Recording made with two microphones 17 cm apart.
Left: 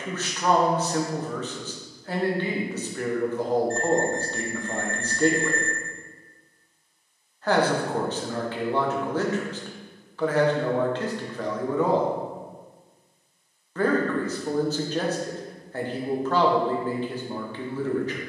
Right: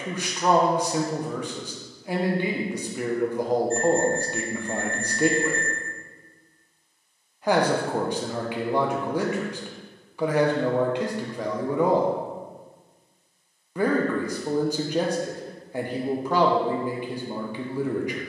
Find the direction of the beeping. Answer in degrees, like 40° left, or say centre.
70° left.